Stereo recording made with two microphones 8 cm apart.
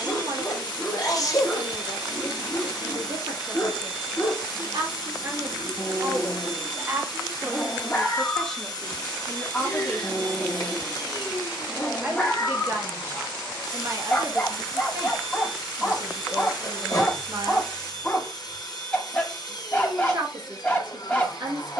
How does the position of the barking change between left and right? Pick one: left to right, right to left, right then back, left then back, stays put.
stays put.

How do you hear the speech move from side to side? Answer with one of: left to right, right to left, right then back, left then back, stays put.
left then back.